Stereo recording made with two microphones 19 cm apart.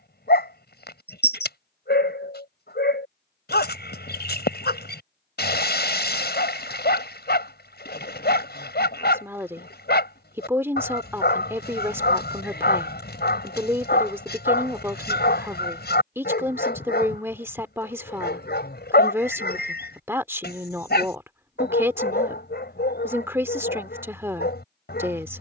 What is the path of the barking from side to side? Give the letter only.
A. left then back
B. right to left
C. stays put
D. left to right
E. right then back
C.